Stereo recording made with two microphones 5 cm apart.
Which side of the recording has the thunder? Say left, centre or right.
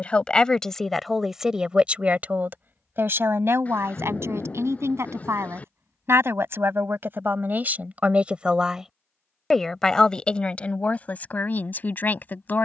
left.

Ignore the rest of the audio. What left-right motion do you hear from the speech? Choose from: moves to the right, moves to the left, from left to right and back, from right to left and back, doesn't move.
from left to right and back.